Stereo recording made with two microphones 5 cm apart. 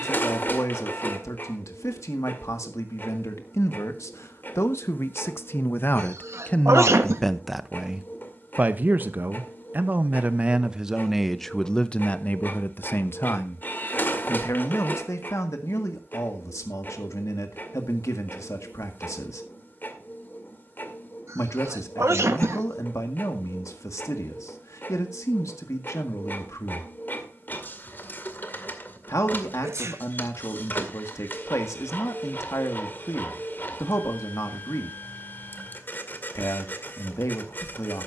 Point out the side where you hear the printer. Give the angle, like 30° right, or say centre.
40° left.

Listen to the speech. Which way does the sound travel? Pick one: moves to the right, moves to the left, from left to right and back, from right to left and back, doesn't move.
from left to right and back.